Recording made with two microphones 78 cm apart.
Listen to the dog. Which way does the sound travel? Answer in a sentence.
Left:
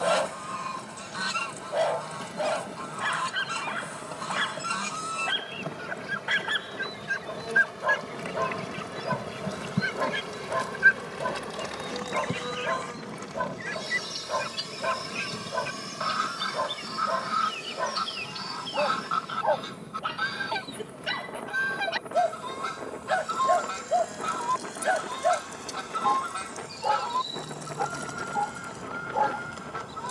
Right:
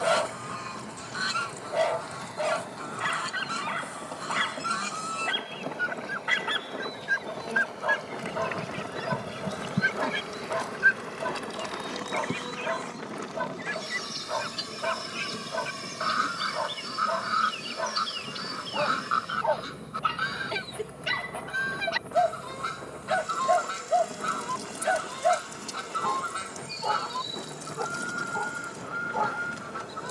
In this clip you hear the dog stay put.